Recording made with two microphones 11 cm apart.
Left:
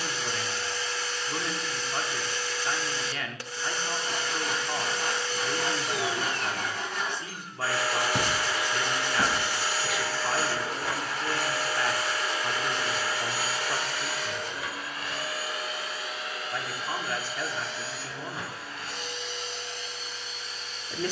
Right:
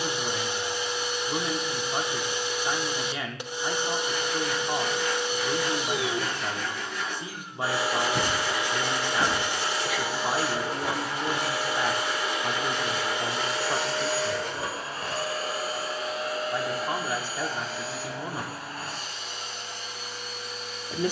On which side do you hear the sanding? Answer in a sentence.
In this clip you hear the sanding on the left.